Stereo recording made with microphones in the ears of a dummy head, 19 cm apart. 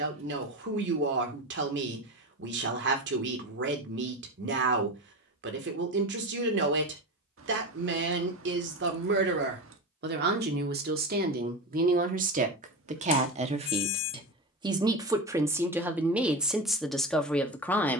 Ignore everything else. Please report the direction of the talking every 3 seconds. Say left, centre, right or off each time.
right, right, right, right, right, centre.